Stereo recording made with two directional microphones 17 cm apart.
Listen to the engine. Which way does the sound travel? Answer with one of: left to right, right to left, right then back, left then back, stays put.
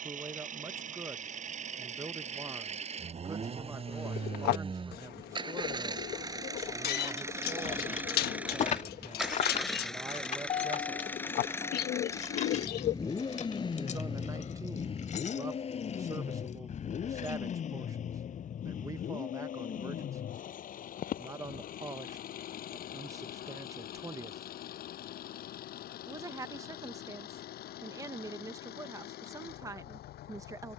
right to left.